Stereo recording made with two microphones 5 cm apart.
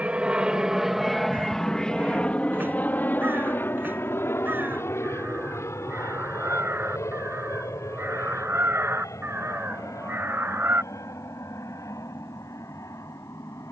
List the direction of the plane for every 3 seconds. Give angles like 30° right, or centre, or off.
10° left, 50° left, 60° left, 70° left, 70° left.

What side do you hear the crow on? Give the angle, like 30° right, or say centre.
40° right.